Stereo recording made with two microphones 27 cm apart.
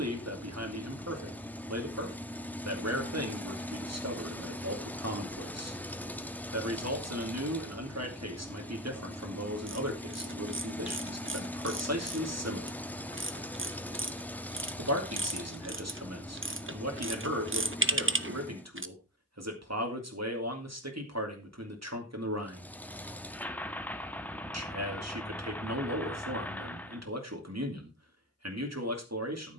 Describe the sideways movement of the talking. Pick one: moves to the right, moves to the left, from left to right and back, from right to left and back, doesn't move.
doesn't move.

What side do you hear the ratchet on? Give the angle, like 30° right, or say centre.
50° right.